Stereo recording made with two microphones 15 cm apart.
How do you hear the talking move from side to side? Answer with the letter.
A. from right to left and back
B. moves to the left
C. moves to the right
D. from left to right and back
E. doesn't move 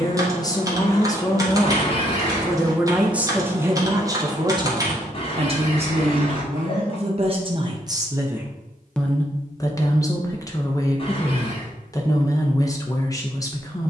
D.